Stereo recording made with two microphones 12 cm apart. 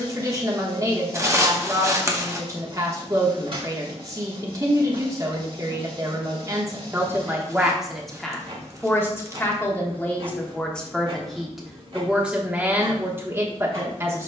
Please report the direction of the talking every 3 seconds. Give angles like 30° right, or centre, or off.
30° right, 30° right, 10° right, 10° left, 20° right.